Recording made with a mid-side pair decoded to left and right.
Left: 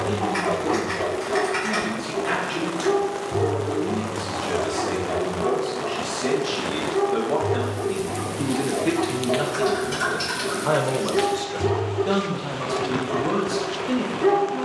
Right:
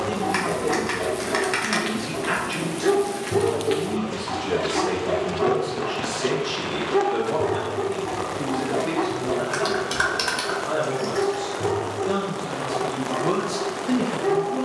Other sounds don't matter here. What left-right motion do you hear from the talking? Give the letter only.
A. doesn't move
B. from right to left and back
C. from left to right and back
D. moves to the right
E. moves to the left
B.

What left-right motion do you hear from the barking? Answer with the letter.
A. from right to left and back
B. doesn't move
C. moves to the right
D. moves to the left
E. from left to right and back
E.